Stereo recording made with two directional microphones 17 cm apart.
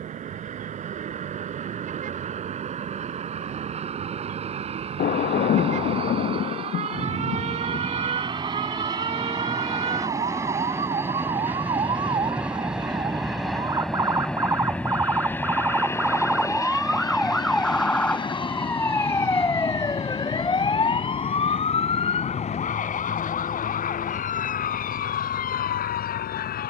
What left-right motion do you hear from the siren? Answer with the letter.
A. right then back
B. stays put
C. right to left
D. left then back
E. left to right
C.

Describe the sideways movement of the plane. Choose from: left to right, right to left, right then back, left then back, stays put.
right to left.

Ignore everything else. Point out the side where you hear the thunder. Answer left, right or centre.
left.